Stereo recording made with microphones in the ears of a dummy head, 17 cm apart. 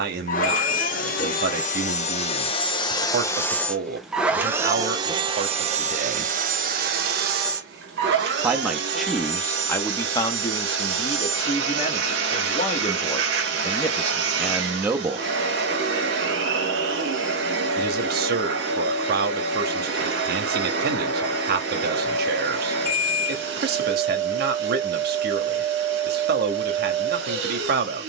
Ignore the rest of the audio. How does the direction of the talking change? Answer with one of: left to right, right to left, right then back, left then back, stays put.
left then back.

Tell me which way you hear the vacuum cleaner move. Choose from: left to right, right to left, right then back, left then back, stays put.
left to right.